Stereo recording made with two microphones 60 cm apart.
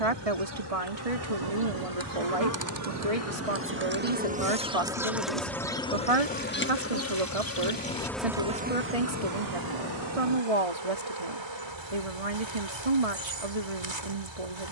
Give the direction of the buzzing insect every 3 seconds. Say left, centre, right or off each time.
right, centre, centre, right, right.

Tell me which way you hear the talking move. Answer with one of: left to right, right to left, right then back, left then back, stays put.
stays put.